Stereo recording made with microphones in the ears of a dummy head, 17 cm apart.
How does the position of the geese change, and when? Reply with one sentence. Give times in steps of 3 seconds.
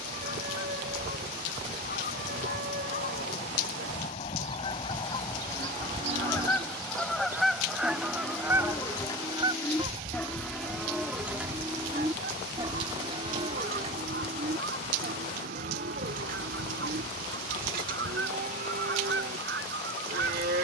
In this clip you hear the geese on the left from 0 s, in the centre from 6 s and on the right from 9 s.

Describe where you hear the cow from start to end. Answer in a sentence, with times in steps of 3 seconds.
In this clip you hear the cow on the right from 0 s, in the centre from 6 s and on the right from 12 s.